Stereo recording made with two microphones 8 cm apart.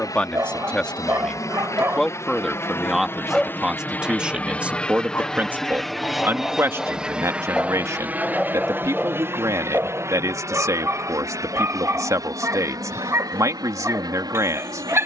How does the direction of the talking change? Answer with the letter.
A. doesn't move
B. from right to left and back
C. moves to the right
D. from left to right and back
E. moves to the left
C.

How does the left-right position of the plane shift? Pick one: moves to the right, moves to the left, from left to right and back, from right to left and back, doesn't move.
moves to the right.